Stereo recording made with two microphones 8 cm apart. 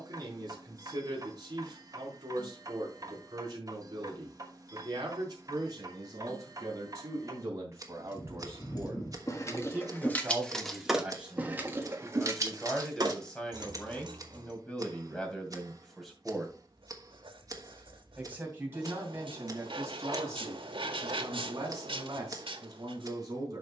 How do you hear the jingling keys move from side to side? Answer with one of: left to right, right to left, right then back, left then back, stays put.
left to right.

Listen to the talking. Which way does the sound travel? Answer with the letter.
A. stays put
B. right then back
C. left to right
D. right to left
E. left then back
E.